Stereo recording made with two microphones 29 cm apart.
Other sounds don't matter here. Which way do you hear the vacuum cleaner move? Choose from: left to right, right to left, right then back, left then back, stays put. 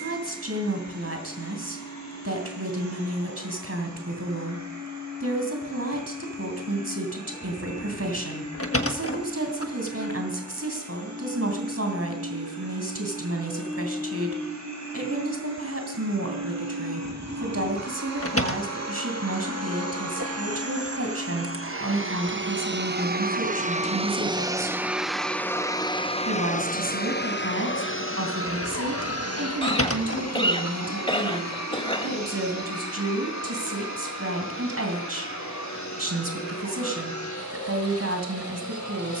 right to left.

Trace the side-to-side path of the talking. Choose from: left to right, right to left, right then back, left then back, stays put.
stays put.